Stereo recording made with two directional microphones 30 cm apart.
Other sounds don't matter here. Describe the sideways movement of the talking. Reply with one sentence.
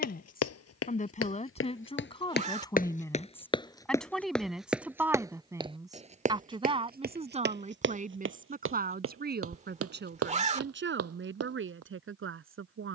You can hear the talking travel towards the right.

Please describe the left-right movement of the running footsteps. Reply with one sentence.
You can hear the running footsteps go from the left side to the right.